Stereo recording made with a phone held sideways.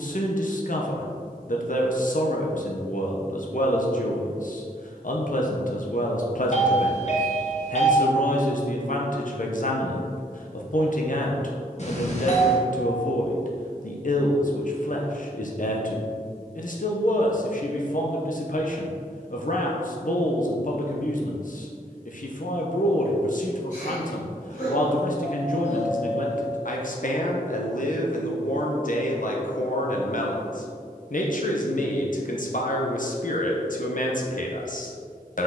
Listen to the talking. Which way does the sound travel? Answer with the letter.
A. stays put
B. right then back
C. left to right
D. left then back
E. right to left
A.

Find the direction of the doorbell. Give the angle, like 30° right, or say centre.
50° left.